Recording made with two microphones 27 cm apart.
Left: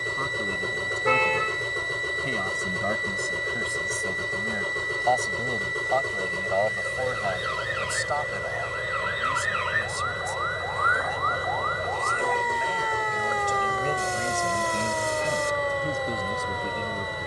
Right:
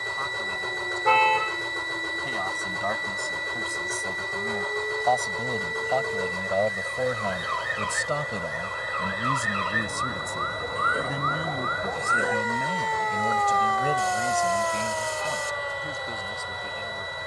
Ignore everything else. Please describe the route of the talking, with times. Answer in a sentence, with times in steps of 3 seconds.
In this clip you hear the talking on the left from 0 s, in the centre from 3 s, on the right from 6 s and on the left from 15 s.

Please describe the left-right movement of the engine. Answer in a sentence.
You can hear the engine stay in one place.